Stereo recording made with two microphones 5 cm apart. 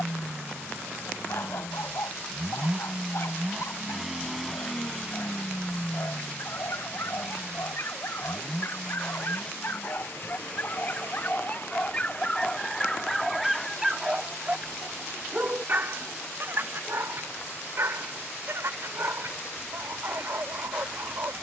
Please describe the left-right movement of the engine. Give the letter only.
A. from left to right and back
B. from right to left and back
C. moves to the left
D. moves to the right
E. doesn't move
C.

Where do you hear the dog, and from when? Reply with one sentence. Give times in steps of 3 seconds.
In this clip you hear the dog on the left from 0 s, in the centre from 12 s and on the right from 15 s.